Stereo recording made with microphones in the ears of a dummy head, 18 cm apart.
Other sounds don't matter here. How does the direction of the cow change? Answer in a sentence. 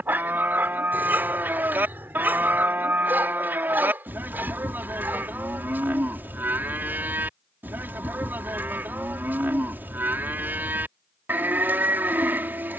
In this clip you hear the cow stay put.